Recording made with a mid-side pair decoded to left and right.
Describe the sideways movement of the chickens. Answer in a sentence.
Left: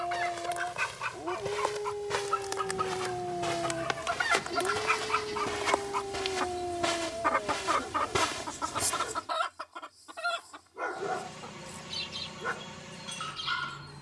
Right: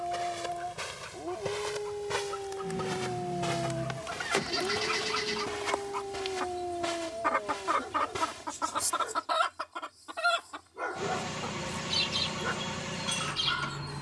You can hear the chickens move from left to right.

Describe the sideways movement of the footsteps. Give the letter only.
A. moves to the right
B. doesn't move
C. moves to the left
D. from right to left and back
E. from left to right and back
C.